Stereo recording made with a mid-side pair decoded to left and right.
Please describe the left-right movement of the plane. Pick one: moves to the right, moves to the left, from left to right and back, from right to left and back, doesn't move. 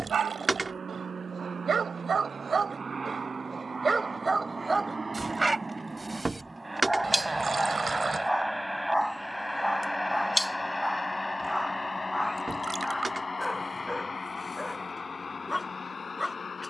moves to the left.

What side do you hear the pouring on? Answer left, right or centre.
right.